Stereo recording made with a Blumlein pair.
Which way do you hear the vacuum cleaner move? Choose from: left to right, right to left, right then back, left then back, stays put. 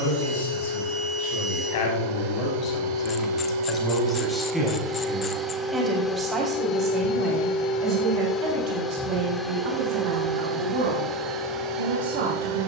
left then back.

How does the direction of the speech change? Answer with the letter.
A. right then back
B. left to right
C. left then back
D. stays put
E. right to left
B.